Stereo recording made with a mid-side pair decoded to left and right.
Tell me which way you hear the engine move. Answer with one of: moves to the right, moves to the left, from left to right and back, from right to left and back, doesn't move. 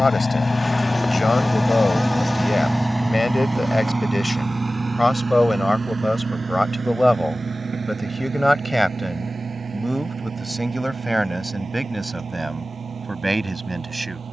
moves to the right.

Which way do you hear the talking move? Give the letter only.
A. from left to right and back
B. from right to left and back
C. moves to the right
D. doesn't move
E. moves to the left
C.